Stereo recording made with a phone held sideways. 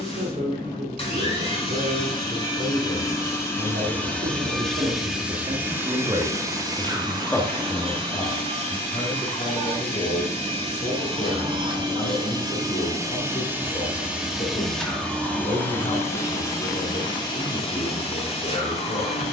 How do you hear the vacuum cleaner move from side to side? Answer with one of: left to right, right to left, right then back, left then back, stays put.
right then back.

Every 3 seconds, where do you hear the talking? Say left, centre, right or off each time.
right, right, centre, left, left, left, left.